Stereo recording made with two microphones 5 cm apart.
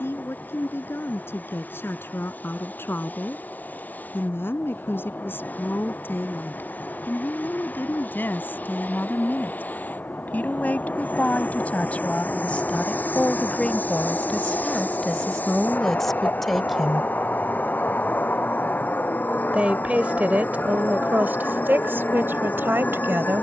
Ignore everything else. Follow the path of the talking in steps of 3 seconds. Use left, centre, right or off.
left, left, left, left, left, centre, right, right.